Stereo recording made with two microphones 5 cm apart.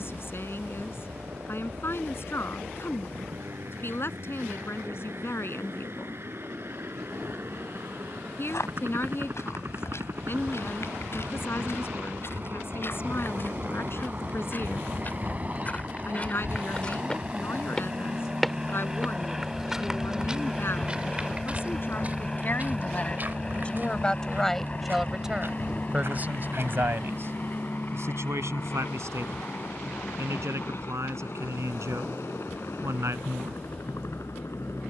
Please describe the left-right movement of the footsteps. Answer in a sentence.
You can hear the footsteps go from the left side to the right.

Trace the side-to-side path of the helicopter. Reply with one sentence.
In this clip you hear the helicopter travel towards the left.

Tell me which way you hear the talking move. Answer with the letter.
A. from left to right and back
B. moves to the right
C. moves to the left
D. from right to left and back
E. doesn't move
B.